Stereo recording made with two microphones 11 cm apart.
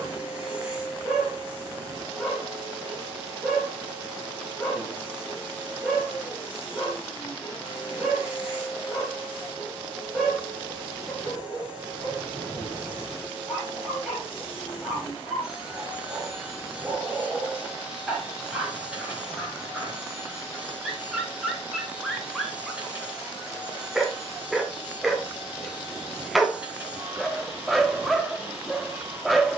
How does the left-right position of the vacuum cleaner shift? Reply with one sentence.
In this clip you hear the vacuum cleaner stay in one place.